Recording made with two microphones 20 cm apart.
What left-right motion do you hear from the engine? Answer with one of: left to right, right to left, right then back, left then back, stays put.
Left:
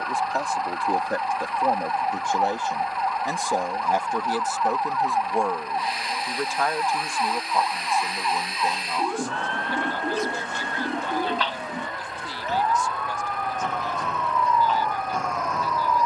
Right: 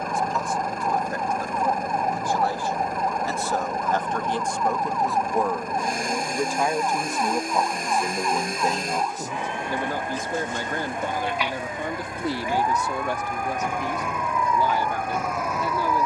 stays put.